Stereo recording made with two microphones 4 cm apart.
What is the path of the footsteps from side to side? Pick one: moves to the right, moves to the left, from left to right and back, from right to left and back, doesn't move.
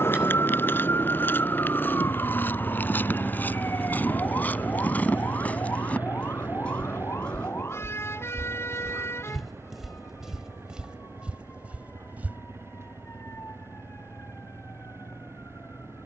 moves to the right.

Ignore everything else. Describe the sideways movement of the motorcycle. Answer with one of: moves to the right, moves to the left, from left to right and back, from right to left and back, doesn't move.
moves to the right.